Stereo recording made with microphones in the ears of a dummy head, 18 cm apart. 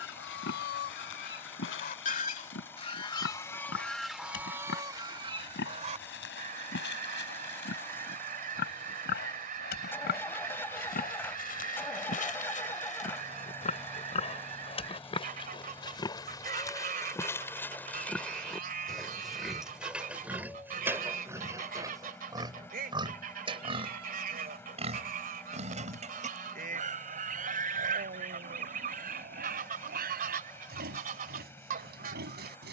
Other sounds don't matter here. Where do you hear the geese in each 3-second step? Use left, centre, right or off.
left, centre, right, right, right, right, right, right, right, right, right.